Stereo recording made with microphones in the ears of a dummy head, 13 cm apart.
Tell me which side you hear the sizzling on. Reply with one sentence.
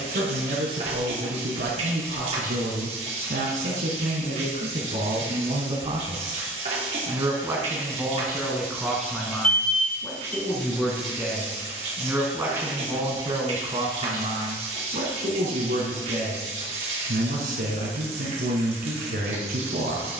You can hear the sizzling on the right.